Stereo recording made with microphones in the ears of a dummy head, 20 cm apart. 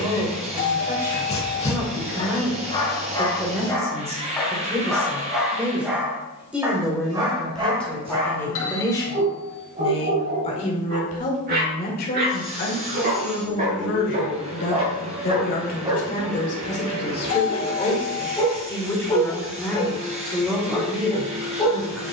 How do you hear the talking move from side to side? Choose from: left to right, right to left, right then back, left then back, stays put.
left then back.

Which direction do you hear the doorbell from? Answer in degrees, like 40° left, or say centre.
60° left.